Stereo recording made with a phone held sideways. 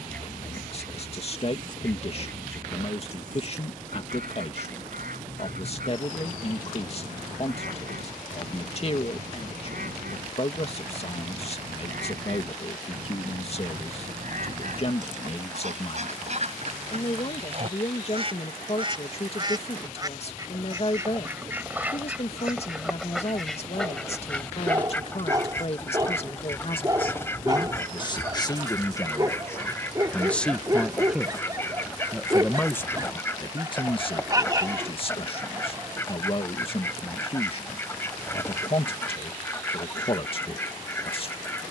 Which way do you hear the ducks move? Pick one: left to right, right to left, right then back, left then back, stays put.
right to left.